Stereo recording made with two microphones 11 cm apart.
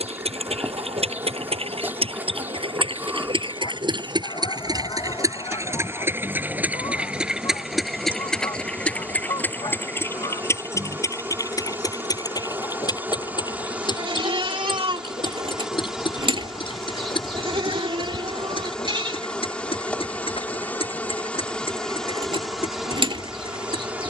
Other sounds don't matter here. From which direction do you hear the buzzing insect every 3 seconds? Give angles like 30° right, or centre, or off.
20° right, 20° right, 20° right, 20° right, 20° right, centre, 10° left, centre.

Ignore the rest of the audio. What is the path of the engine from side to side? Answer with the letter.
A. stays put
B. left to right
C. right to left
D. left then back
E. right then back
C.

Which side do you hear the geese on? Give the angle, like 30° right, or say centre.
40° left.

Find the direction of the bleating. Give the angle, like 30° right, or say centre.
50° right.